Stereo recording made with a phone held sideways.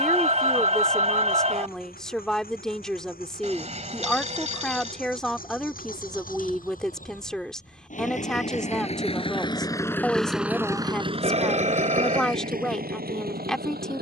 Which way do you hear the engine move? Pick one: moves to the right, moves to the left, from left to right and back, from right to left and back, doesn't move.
moves to the right.